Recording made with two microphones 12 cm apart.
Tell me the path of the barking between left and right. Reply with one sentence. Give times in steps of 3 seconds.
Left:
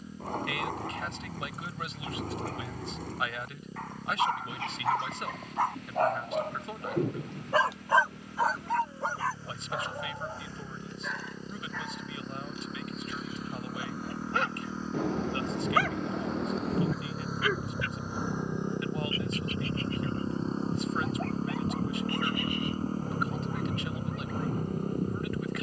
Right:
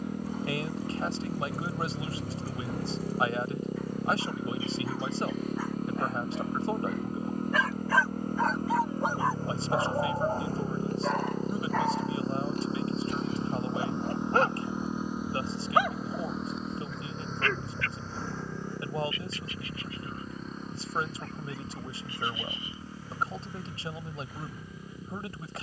In this clip you hear the barking on the left from 0 s, on the right from 9 s, in the centre from 15 s and on the left from 18 s.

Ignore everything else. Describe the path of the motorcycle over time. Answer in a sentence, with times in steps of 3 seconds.
You can hear the motorcycle on the right from 0 s, in the centre from 15 s and on the left from 18 s.